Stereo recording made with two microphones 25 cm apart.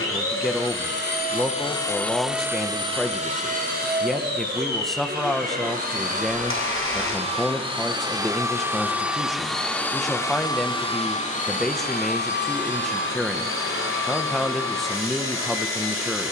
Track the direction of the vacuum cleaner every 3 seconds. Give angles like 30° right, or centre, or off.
20° left, 40° right, 20° right, 20° left, 50° left, 50° left.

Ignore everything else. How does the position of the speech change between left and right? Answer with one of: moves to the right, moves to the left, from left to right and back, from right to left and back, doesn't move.
doesn't move.